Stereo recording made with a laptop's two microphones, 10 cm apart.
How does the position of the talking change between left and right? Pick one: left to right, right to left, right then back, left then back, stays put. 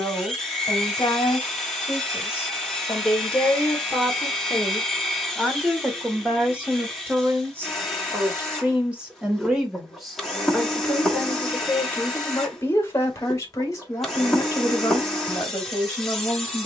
right then back.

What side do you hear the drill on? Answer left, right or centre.
centre.